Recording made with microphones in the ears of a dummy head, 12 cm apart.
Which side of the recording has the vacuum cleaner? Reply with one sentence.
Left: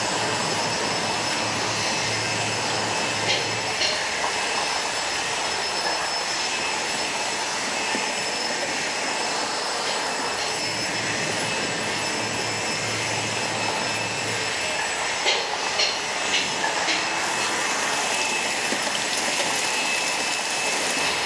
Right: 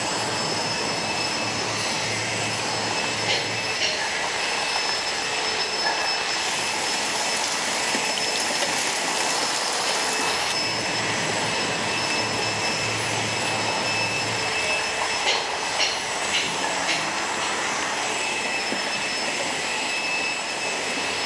You can hear the vacuum cleaner on the left.